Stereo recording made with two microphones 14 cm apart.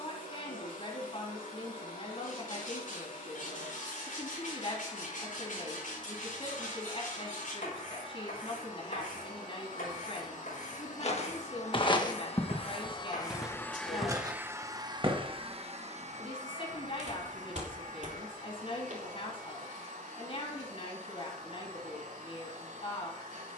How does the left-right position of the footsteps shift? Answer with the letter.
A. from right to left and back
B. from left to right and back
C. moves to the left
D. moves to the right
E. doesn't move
D.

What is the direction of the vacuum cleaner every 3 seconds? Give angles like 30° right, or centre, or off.
70° left, 70° left, 70° left, 60° left, 10° left, 60° right, 70° right, 80° right.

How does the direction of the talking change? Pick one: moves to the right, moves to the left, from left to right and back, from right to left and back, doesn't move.
doesn't move.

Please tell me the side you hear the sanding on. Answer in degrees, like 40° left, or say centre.
80° left.